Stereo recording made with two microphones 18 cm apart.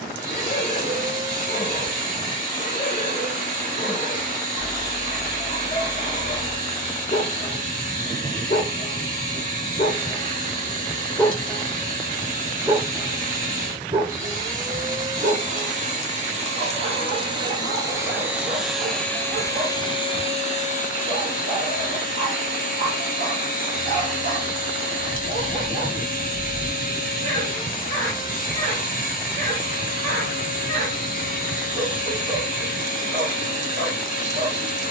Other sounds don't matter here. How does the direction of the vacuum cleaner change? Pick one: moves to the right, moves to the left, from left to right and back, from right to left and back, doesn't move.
moves to the left.